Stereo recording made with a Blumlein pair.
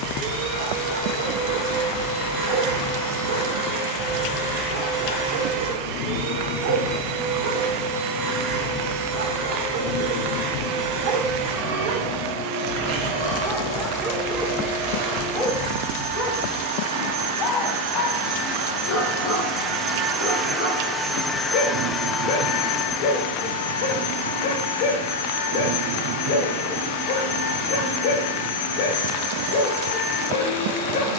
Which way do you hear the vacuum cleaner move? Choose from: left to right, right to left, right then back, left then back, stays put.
right to left.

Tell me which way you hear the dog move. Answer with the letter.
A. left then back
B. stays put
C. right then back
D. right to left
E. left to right
D.